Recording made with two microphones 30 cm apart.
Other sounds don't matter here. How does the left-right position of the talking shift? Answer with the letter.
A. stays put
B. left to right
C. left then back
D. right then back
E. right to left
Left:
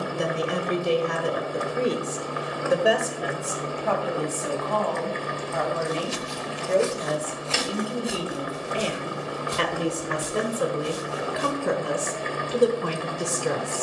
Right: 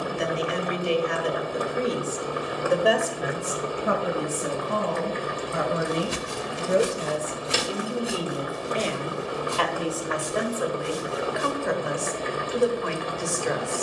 D.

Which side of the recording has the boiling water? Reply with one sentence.
You can hear the boiling water on the right.